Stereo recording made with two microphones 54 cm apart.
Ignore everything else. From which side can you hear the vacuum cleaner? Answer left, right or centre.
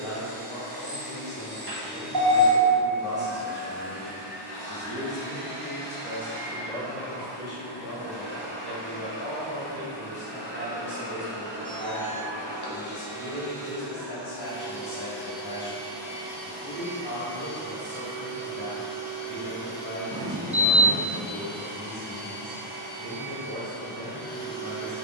right.